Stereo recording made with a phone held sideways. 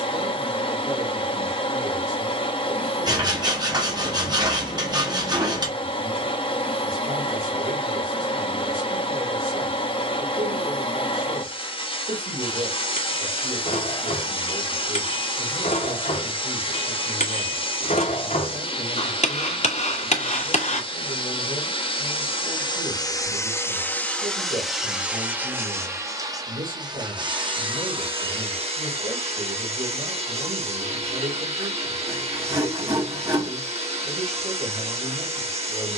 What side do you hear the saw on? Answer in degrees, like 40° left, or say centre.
30° right.